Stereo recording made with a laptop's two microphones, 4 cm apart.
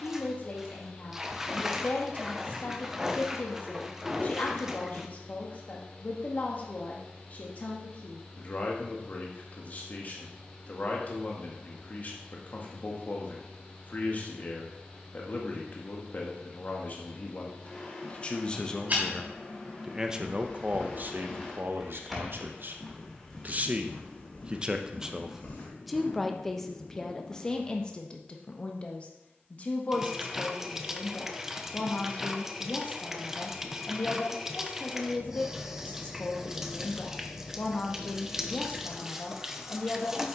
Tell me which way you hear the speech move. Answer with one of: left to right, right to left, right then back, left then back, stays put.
right then back.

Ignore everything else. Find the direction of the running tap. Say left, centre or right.
centre.